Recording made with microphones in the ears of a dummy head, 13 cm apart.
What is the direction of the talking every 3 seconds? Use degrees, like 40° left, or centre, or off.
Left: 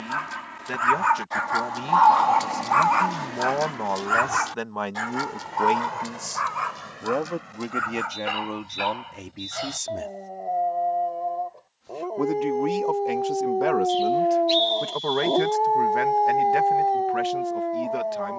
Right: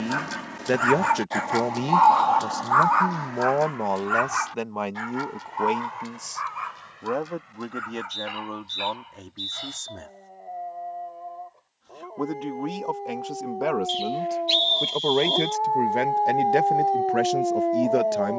50° right, 10° right, 10° left, 20° left, centre, 40° right.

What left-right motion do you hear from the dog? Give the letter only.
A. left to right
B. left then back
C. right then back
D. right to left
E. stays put
B.